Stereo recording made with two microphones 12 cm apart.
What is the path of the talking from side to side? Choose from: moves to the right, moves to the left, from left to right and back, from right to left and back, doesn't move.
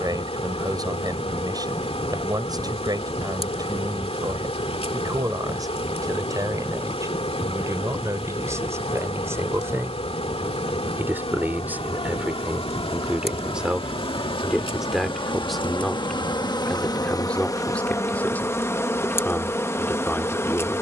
moves to the left.